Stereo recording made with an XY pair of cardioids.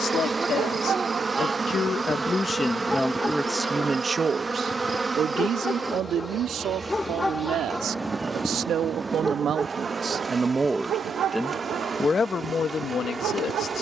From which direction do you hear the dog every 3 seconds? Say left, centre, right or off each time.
right, left, centre, right, right.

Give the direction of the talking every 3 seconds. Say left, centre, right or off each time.
left, right, right, right, left.